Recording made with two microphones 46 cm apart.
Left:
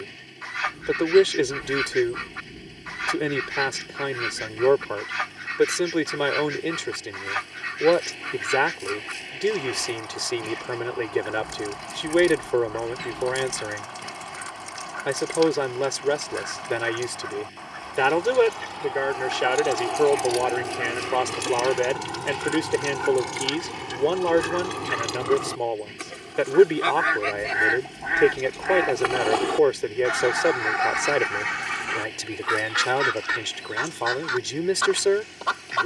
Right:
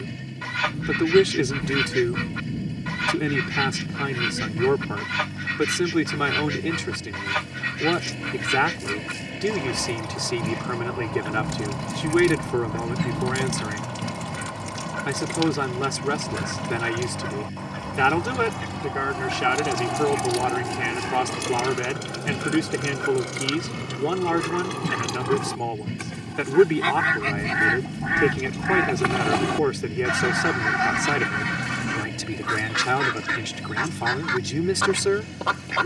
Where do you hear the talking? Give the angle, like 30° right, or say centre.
30° right.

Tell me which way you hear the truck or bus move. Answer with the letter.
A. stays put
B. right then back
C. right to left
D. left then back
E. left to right
A.